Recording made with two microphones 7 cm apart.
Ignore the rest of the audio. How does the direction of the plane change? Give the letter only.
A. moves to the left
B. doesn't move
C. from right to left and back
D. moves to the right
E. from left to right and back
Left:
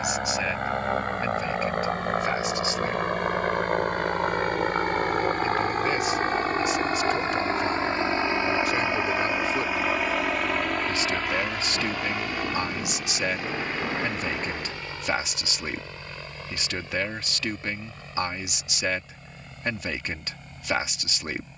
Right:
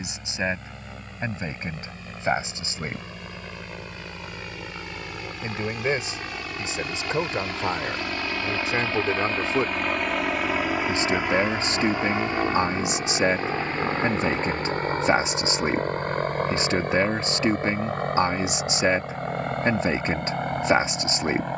D.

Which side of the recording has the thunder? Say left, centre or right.
centre.